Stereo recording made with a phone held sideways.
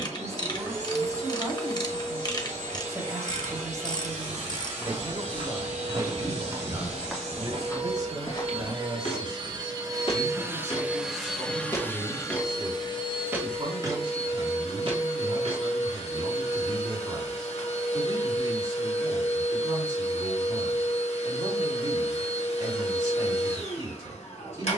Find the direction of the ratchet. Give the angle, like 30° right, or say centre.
30° left.